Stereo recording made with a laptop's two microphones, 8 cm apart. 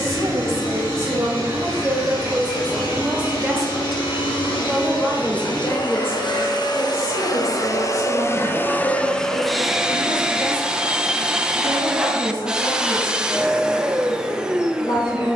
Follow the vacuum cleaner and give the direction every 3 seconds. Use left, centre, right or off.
left, left, left, centre, centre.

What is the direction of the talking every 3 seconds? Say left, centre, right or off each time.
right, centre, left, left, left.